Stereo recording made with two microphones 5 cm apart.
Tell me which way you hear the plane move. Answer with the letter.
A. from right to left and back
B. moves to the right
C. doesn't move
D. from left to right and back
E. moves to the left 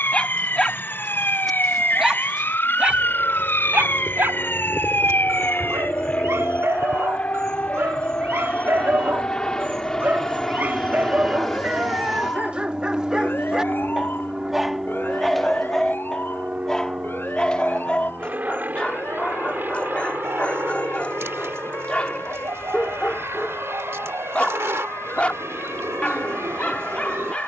B.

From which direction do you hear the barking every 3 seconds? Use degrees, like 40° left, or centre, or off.
centre, 60° right, 60° right, 40° right, 20° right, 10° left, 20° left, 20° left, 20° left.